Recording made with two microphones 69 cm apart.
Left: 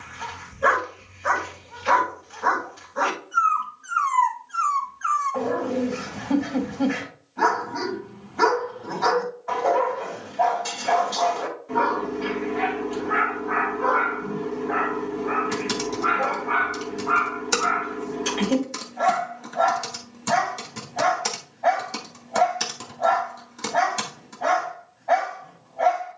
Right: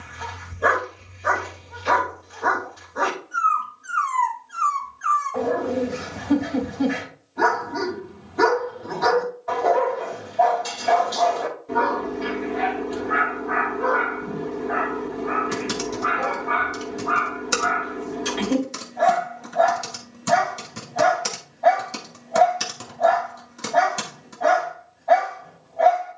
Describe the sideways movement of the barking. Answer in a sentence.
In this clip you hear the barking stay in one place.